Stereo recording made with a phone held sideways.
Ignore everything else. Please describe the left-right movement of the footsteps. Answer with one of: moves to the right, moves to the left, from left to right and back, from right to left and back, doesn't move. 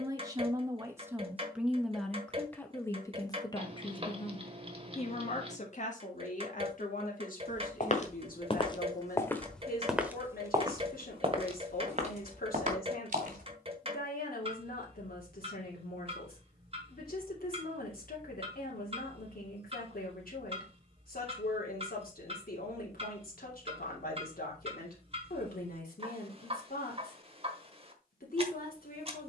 moves to the right.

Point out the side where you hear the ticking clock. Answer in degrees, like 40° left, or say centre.
40° right.